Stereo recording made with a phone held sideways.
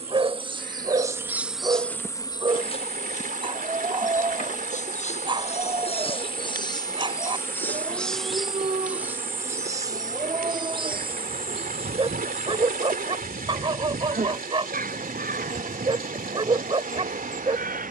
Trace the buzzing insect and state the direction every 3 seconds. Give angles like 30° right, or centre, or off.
centre, 50° left, 10° left, 30° right, 50° right, 60° right.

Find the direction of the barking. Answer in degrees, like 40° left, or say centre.
30° right.